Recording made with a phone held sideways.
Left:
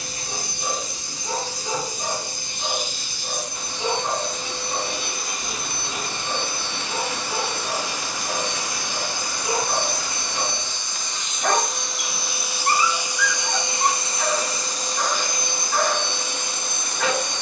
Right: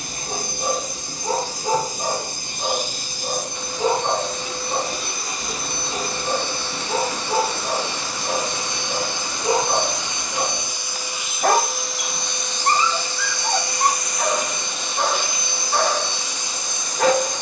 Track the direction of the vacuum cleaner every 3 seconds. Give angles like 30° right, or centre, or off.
50° right, 40° right, 30° right, 10° right, 20° left, 50° left.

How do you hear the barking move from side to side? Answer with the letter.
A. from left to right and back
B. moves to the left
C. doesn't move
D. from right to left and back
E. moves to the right
C.